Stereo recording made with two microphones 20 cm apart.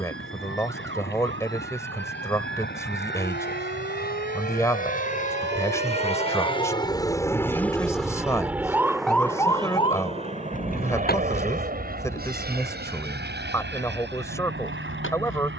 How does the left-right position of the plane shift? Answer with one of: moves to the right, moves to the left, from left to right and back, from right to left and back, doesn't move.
moves to the right.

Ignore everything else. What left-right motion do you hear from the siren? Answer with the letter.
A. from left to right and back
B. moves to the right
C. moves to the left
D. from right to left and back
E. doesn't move
C.